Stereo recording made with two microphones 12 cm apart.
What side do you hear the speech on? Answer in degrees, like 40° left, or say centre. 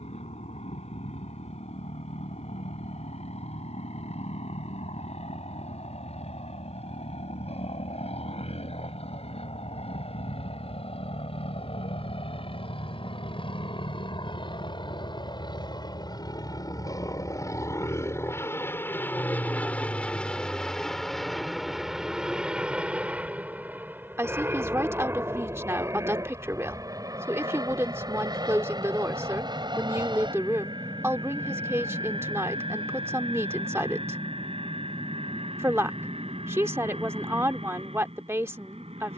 20° right.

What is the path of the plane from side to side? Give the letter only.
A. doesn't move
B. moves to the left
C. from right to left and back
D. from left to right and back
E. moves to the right
E.